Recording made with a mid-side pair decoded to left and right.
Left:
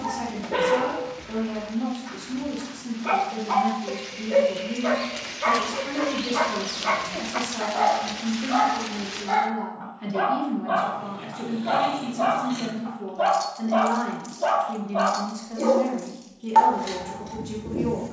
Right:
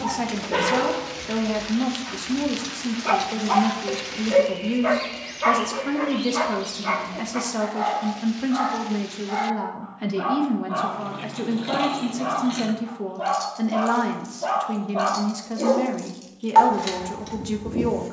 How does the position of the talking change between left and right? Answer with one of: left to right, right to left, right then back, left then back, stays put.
stays put.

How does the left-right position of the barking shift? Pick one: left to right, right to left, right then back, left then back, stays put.
left then back.